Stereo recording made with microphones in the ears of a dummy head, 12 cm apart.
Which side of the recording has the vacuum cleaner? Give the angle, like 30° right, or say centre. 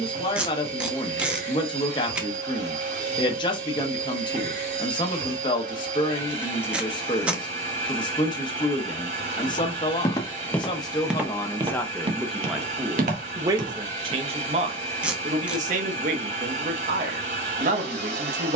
50° right.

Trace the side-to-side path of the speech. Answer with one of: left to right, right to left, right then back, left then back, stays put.
left to right.